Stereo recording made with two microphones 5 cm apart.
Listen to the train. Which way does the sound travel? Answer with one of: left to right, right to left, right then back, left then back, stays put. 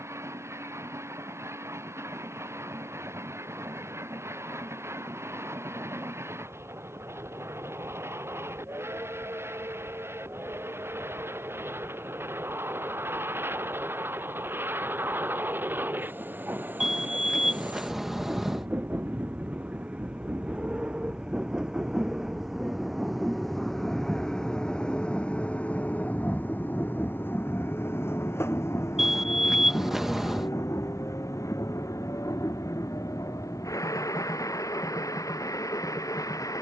right to left.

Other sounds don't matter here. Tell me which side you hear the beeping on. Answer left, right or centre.
centre.